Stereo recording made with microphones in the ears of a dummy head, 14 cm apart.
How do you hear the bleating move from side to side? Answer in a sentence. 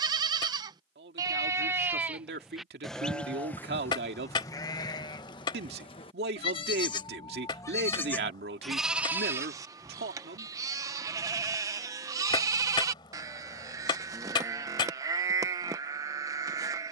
You can hear the bleating go left and come back.